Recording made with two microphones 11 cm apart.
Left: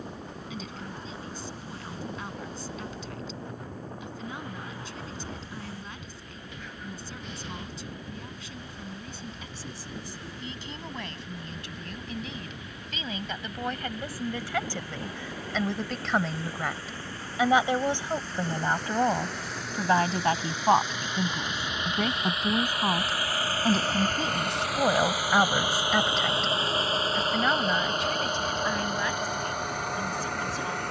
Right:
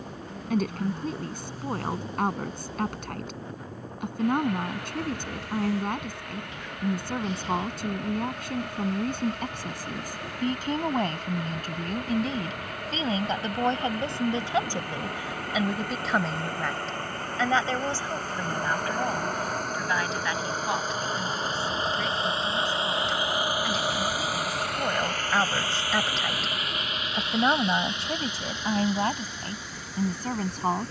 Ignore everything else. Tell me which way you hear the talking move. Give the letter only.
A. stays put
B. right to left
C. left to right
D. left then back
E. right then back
D.